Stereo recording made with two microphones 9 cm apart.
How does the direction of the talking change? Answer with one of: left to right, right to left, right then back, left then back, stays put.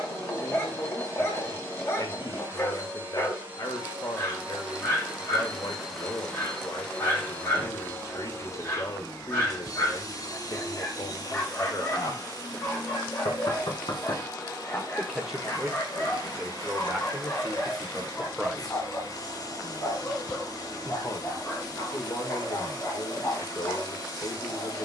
right then back.